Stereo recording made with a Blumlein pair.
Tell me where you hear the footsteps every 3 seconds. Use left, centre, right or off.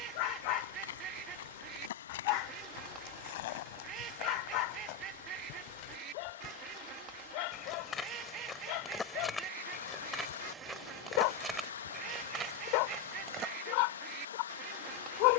left, left, left, centre, right.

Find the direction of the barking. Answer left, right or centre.
left.